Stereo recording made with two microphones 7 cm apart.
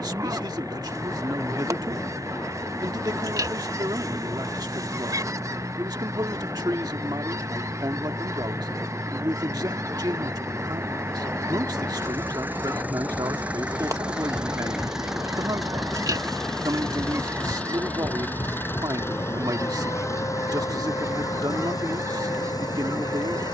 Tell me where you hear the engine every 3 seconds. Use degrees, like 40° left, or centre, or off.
50° right, 50° right, 40° right, 30° right, 20° right, 10° left, 40° left, 60° left.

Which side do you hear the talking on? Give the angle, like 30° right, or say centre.
70° right.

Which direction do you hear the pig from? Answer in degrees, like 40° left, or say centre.
60° right.